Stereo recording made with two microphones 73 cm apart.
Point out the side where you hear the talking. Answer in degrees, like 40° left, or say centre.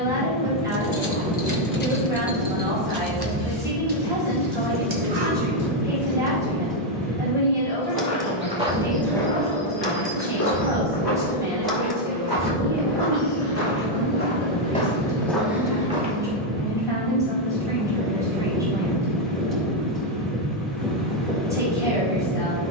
centre.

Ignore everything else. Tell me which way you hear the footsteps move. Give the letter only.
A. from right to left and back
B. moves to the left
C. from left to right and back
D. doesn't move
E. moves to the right
A.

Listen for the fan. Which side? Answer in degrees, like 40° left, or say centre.
centre.